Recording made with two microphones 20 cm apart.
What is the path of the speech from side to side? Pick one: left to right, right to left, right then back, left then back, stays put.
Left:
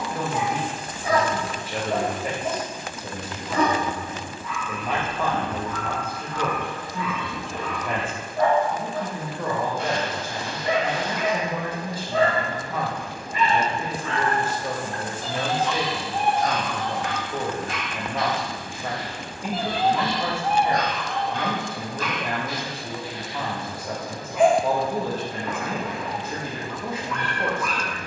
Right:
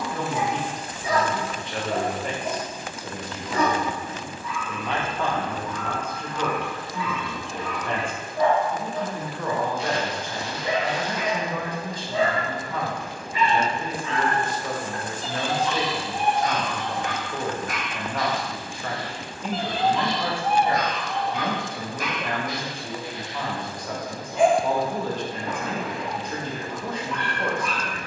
stays put.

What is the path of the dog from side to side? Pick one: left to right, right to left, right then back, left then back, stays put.
left to right.